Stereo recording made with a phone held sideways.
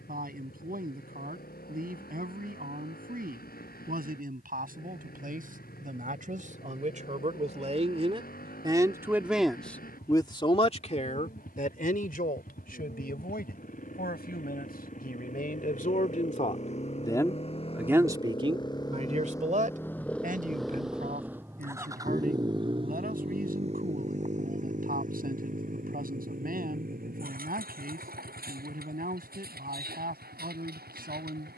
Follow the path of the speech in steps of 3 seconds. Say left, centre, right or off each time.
right, right, right, left, left, left, right, right, right, right, right.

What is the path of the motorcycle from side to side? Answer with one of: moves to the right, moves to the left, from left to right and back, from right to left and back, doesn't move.
moves to the right.